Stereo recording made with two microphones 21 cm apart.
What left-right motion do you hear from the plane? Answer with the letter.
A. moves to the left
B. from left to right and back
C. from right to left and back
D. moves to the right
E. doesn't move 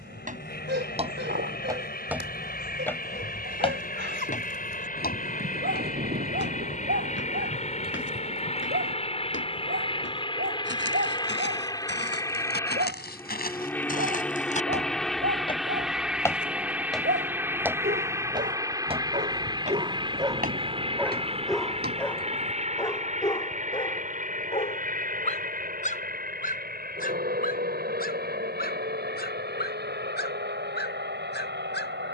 D.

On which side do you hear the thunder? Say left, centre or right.
right.